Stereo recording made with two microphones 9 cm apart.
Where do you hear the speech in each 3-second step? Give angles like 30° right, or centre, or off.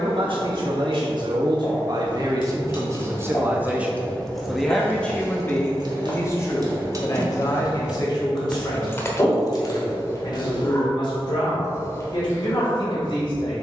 50° right, centre, 40° left, 60° left, 60° left.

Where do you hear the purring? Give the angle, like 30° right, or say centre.
30° left.